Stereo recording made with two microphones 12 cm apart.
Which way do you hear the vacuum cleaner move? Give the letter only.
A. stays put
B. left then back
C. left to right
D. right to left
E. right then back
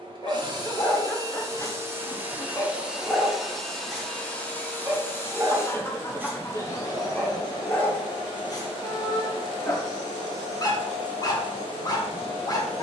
D.